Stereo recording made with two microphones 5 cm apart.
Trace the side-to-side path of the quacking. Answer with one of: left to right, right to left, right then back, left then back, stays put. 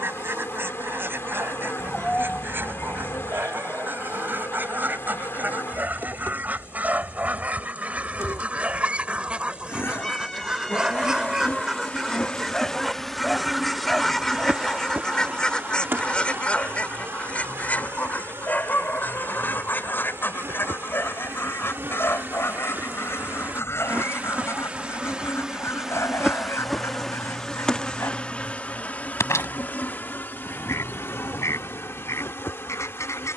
right to left.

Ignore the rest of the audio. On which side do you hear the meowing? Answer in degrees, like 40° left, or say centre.
10° left.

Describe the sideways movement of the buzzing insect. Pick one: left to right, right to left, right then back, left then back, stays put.
right then back.